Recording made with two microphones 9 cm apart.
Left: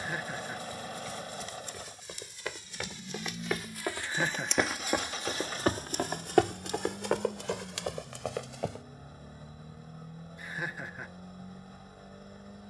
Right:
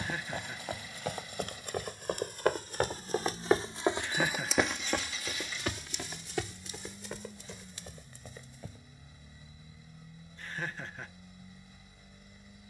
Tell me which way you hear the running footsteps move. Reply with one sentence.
You can hear the running footsteps travel towards the left.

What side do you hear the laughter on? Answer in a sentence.
In this clip you hear the laughter in the centre.